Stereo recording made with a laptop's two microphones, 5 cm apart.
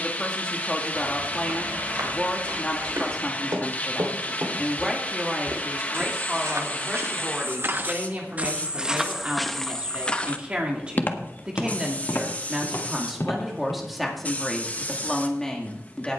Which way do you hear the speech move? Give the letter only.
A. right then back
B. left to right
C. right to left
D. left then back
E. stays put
A.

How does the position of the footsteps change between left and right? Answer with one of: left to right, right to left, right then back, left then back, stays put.
right to left.